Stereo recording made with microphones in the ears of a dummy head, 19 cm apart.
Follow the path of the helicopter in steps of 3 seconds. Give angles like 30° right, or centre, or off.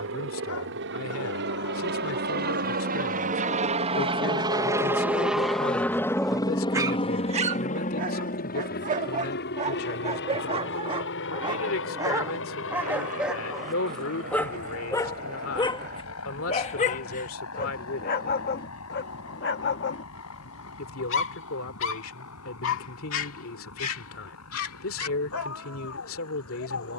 60° right, 20° right, 30° left, 50° left, 60° left, 70° left, 70° left, 70° left, 80° left.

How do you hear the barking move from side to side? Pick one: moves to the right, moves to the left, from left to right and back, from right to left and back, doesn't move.
from left to right and back.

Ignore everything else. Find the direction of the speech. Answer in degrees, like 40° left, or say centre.
70° left.